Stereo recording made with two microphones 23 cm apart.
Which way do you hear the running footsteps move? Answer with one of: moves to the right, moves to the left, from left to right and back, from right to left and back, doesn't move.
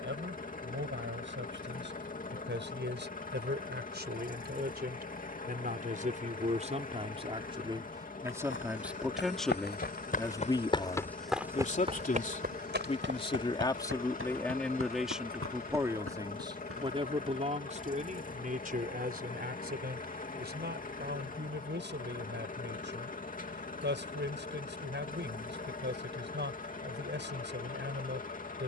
moves to the right.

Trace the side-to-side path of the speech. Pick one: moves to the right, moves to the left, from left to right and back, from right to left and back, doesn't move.
from right to left and back.